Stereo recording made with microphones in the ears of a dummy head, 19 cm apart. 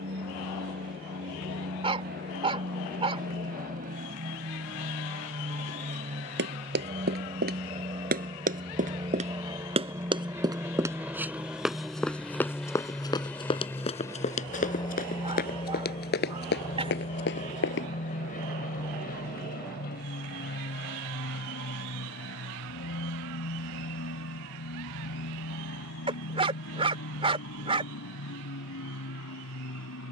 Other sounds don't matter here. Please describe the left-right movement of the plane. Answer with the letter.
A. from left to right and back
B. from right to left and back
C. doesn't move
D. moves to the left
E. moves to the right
D.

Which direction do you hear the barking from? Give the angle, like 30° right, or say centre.
30° right.